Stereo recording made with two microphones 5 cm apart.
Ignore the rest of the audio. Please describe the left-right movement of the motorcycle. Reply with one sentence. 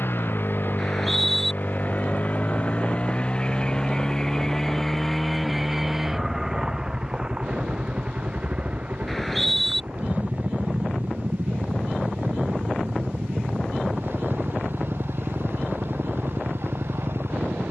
In this clip you hear the motorcycle move from left to right.